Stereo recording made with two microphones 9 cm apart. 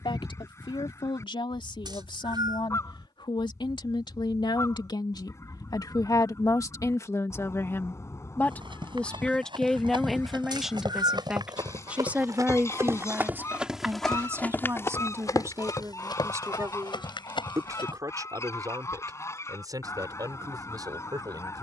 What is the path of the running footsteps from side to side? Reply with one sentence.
You can hear the running footsteps move to the left.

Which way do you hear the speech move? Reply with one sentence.
In this clip you hear the speech go from the left side to the right.